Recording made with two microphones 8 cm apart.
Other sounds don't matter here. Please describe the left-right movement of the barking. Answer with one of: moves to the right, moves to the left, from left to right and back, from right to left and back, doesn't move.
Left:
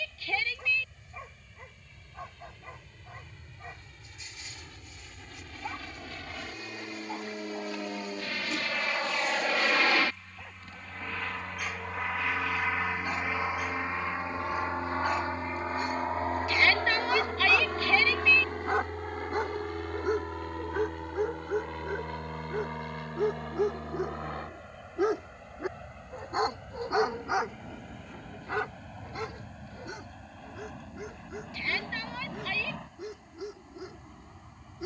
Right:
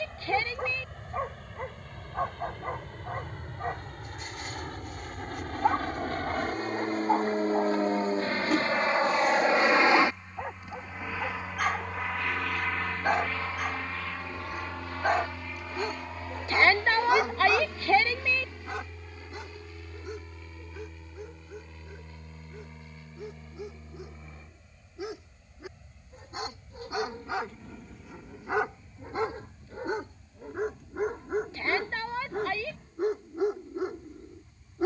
from right to left and back.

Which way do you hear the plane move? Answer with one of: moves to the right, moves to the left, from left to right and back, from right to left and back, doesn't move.
moves to the left.